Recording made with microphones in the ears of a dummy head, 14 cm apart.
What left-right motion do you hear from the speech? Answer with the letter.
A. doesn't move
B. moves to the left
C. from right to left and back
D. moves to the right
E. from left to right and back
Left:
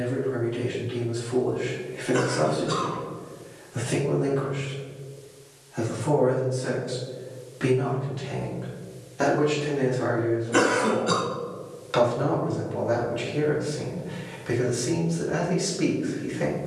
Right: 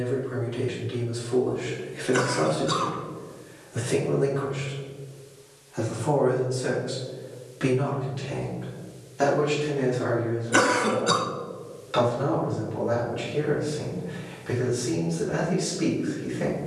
B.